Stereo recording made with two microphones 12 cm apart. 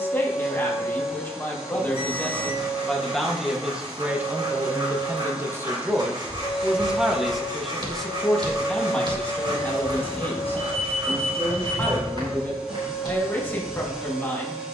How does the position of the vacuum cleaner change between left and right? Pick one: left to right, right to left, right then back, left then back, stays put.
stays put.